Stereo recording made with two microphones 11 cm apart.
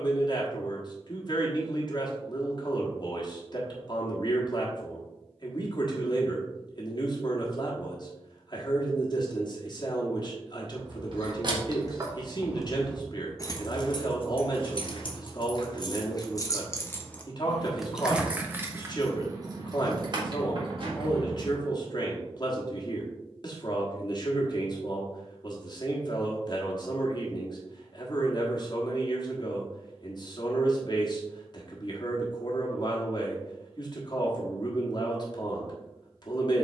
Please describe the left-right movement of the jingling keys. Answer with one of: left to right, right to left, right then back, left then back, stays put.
left then back.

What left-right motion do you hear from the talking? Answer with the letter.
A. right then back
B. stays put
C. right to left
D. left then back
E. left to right
B.